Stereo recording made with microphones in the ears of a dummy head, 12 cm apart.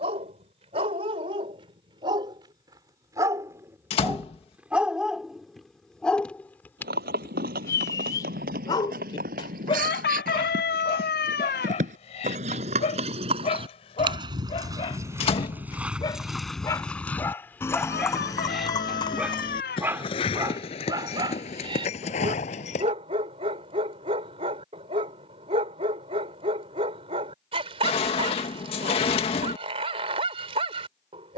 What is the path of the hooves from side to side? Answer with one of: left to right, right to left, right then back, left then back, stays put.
right to left.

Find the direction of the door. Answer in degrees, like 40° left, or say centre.
40° left.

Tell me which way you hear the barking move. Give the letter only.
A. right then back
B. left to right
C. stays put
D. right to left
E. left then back
E.